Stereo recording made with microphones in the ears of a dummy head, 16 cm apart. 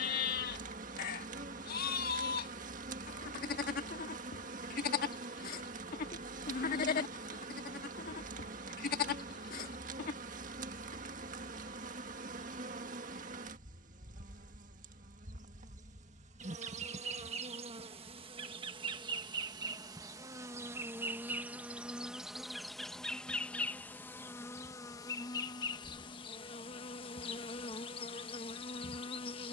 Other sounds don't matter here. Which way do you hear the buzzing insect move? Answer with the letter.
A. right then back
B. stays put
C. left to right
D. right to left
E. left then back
D.